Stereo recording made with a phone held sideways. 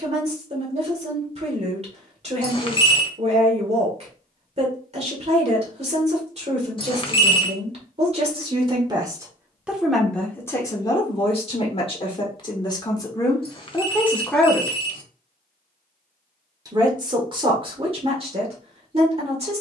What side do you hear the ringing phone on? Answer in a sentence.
You can hear the ringing phone on the left.